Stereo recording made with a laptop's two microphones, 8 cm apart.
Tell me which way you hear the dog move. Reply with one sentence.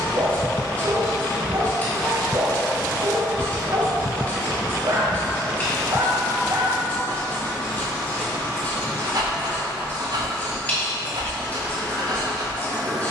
In this clip you hear the dog stay in one place.